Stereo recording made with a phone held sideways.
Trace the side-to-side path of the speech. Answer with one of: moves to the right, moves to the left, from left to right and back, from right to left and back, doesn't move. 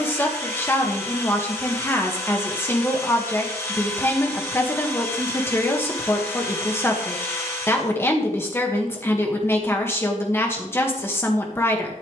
doesn't move.